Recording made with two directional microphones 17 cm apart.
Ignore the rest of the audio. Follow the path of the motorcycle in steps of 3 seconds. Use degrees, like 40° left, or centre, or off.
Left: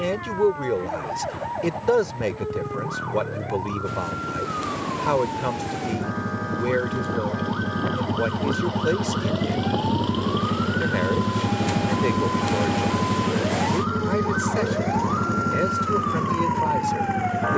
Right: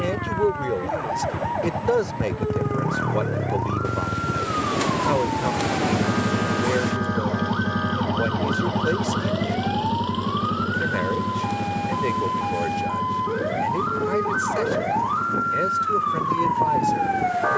50° right, 40° right, 20° right, 10° left, 40° left, 60° left.